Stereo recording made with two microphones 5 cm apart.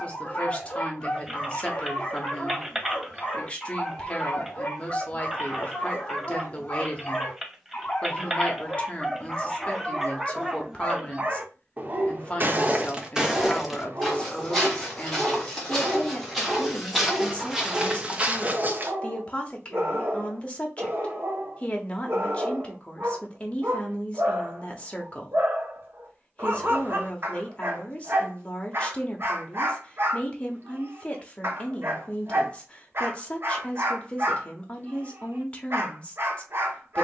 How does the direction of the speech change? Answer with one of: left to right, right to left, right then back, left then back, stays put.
stays put.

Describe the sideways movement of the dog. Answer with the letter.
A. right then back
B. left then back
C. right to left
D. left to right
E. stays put
D.